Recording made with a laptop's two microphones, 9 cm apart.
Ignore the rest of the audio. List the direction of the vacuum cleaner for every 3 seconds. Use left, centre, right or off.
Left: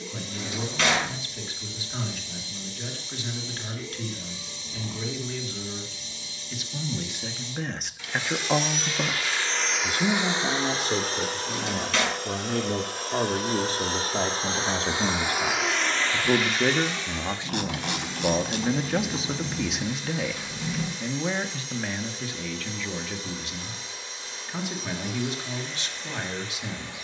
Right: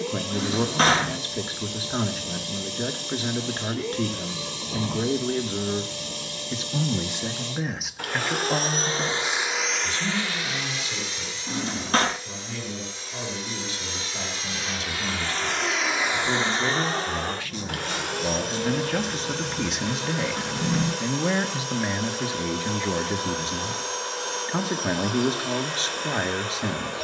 right, right, right, left, left, right, right, right, right.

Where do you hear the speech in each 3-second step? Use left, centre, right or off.
right, right, centre, left, left, left, centre, right, right.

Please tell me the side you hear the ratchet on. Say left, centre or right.
left.